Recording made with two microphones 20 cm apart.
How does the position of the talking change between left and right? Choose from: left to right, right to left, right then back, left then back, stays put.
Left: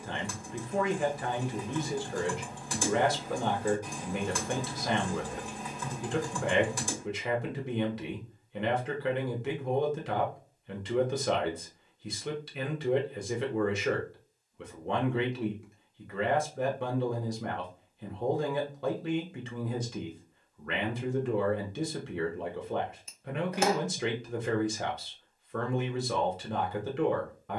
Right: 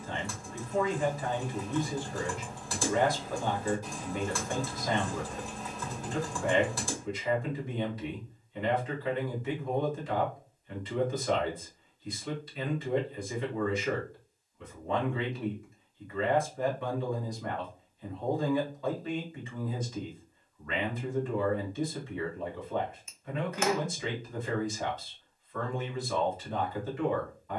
stays put.